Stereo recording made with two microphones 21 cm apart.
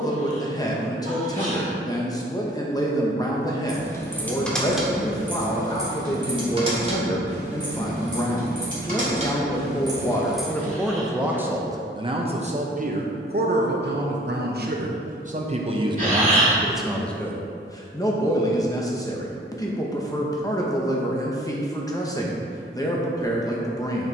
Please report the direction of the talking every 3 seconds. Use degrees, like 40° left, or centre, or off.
20° left, 20° left, 20° left, 10° left, 40° right, 10° right, 20° left, 20° left.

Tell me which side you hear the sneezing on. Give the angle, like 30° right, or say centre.
40° right.